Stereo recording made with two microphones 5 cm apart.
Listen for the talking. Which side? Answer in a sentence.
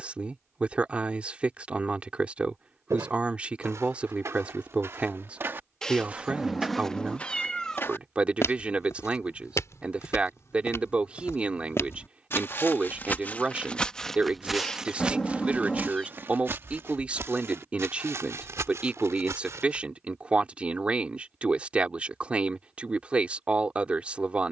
You can hear the talking on the right.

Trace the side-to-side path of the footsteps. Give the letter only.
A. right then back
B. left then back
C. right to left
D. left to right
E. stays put
B.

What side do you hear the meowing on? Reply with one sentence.
You can hear the meowing in the centre.